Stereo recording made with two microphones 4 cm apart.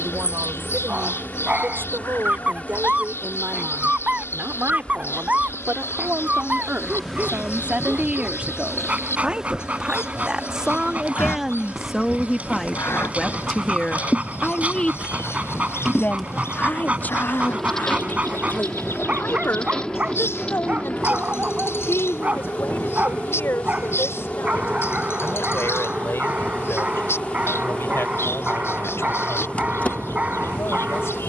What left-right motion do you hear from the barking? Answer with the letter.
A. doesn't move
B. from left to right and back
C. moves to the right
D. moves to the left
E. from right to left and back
A.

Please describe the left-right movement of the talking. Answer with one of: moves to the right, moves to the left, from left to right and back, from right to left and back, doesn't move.
moves to the left.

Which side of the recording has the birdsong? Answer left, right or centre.
left.